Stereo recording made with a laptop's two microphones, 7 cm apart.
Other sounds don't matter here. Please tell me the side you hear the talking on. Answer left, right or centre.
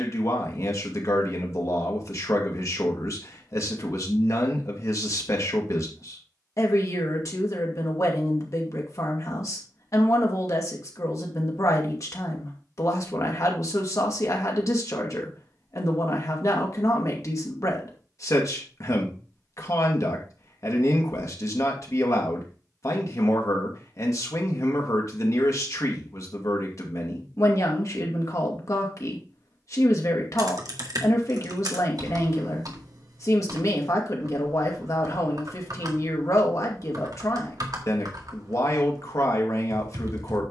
left.